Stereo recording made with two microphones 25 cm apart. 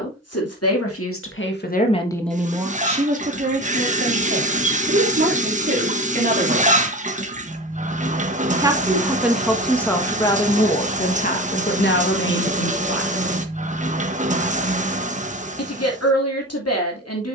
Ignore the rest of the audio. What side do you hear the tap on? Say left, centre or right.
right.